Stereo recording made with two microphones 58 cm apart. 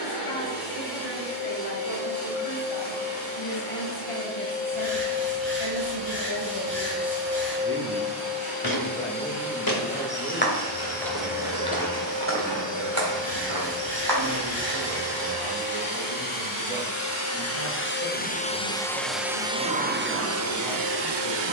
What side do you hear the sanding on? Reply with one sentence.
In this clip you hear the sanding on the left.